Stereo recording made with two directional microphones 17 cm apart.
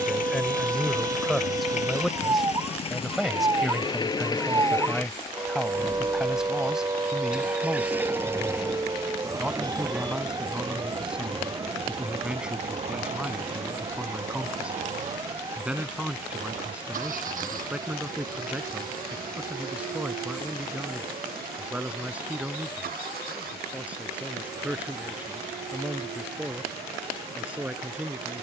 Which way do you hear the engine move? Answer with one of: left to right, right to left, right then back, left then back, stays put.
left to right.